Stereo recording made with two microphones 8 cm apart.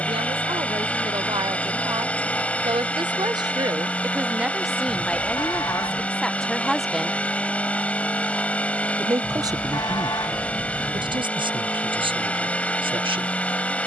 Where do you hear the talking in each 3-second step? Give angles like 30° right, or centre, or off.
80° right, 20° right, centre, 60° right, 80° right.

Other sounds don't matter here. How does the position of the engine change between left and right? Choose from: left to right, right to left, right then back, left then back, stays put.
stays put.